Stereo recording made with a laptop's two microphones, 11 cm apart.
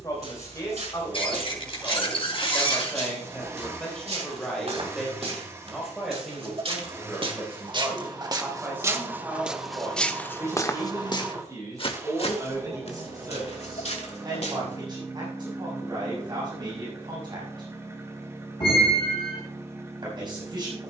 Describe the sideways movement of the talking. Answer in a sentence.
You can hear the talking move from left to right.